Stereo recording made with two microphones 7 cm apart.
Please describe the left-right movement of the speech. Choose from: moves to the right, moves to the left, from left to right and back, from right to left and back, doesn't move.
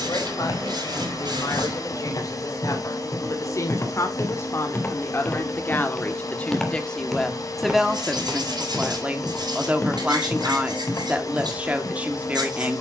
moves to the right.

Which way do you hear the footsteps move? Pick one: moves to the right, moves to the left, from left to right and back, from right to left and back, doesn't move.
from left to right and back.